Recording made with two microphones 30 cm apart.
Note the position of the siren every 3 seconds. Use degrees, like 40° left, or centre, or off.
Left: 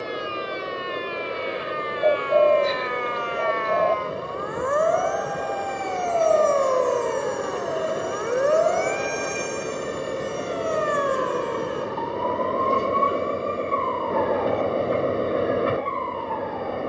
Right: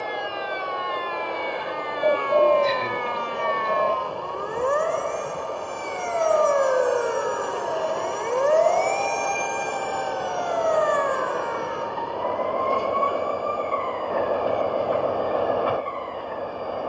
60° right, 40° right, centre, 30° left, 50° left, 60° left.